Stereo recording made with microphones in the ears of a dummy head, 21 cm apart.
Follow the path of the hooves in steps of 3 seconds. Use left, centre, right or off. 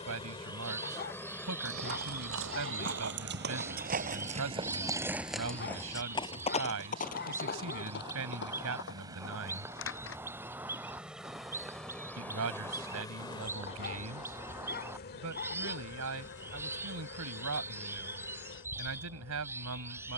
right, right, left, left, off, off, off.